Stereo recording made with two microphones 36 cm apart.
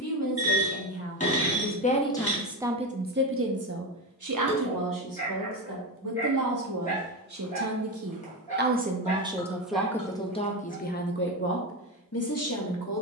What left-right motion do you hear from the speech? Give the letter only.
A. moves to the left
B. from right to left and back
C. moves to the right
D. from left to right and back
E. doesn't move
D.